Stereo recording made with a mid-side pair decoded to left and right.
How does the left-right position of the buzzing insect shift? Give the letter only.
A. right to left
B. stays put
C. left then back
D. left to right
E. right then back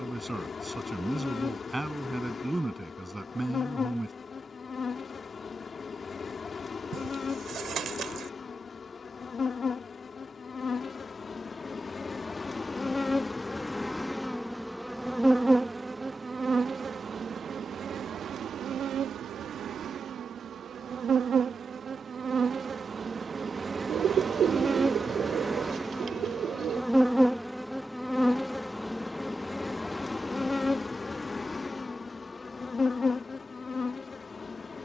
E.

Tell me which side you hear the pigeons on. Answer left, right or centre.
right.